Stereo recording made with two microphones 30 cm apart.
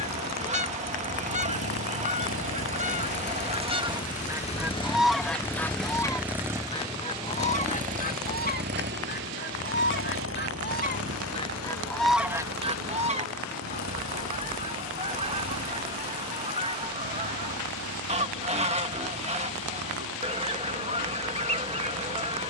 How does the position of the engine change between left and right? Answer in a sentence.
You can hear the engine move from left to right.